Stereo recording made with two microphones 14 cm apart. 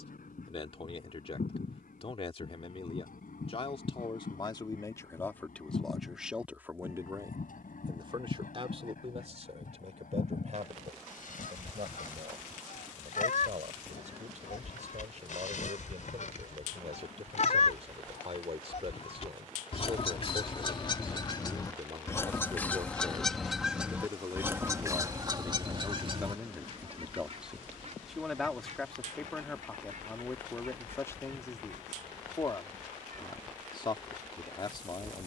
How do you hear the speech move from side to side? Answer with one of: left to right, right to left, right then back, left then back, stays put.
right then back.